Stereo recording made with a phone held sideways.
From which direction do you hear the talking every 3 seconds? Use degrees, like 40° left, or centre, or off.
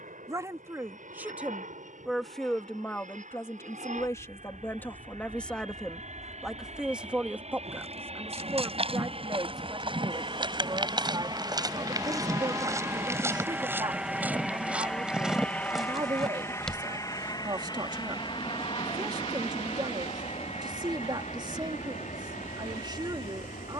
10° right, 10° left, 10° right, 30° right, 30° right, 30° right, 30° right, 30° right.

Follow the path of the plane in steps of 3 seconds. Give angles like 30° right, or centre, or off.
70° right, 60° right, 50° right, 30° right, 10° right, 20° left, 40° left, 50° left.